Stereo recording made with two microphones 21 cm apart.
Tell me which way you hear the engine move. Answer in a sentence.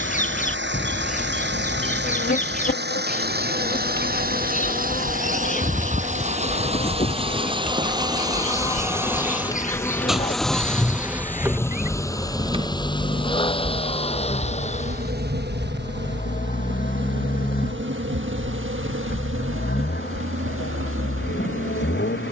In this clip you hear the engine move to the left.